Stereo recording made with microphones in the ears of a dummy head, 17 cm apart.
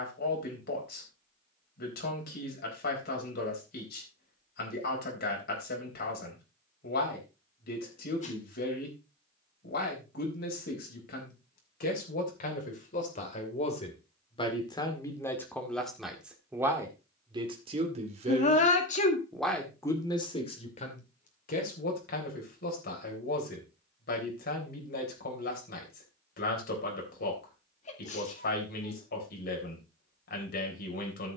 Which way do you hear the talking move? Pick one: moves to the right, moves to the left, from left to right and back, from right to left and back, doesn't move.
from left to right and back.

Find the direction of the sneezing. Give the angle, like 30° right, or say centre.
40° left.